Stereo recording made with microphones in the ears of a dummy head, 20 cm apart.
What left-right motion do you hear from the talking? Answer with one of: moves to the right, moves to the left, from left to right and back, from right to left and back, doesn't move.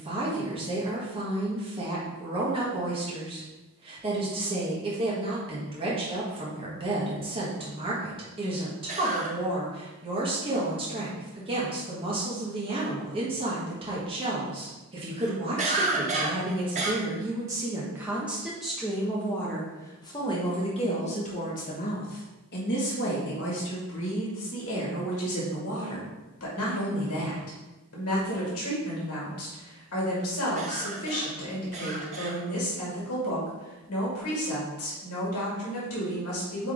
moves to the left.